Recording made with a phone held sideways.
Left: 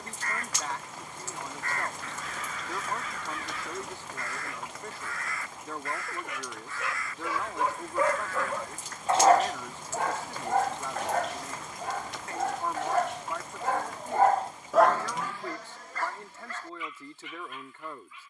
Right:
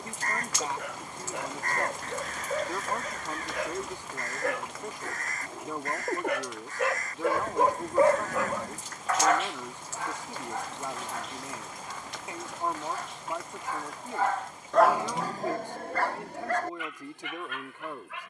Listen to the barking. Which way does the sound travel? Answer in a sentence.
In this clip you hear the barking move from right to left and back again.